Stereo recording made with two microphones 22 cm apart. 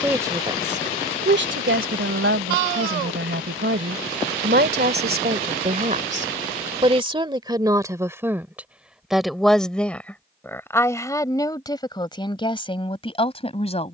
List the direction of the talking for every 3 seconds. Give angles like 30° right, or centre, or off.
50° right, 50° right, 20° right, 10° left, 20° left.